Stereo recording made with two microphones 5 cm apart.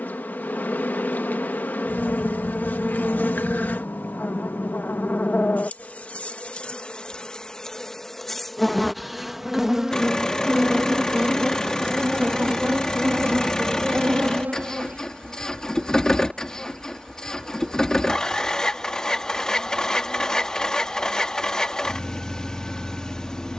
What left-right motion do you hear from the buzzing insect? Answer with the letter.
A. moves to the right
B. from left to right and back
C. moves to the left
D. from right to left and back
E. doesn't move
B.